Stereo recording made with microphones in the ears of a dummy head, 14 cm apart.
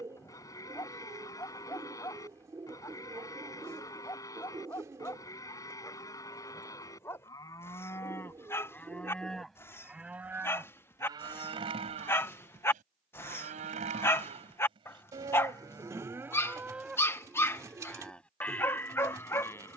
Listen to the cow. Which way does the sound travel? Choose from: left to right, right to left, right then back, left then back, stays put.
right then back.